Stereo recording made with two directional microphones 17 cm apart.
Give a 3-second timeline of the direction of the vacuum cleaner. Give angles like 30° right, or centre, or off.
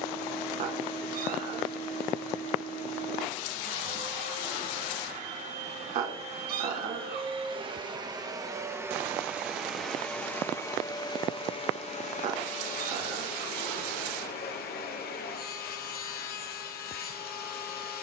40° right, 40° right, 30° right, 10° left, 60° left, 60° left.